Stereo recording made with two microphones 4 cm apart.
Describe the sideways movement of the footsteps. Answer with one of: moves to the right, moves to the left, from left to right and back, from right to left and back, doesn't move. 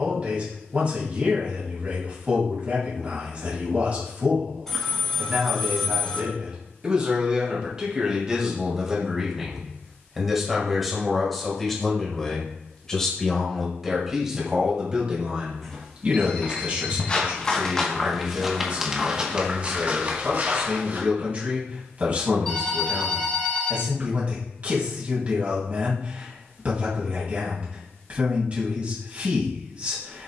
moves to the right.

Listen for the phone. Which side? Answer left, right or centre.
centre.